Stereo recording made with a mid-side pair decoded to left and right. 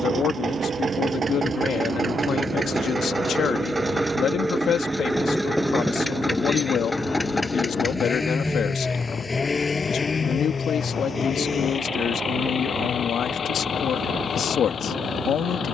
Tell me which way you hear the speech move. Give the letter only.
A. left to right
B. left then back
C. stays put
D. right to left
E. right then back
C.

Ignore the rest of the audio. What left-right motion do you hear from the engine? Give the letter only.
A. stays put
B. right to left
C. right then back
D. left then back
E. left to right
B.